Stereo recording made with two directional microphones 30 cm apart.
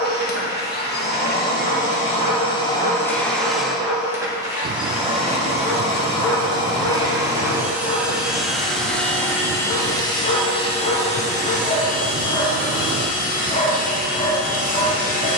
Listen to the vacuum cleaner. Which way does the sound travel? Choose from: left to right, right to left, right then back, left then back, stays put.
right then back.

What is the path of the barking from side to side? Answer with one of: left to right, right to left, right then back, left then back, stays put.
right to left.